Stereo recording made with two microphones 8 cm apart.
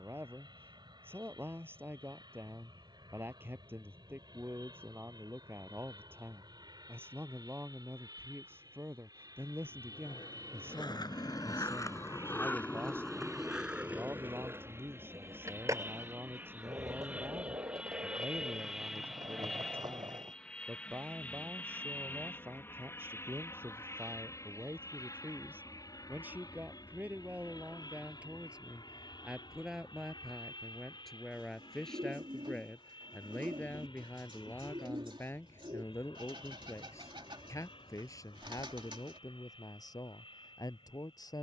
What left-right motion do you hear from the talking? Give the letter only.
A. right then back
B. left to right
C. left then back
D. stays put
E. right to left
E.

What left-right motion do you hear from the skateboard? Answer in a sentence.
In this clip you hear the skateboard move to the right.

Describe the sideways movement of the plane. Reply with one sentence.
In this clip you hear the plane move to the left.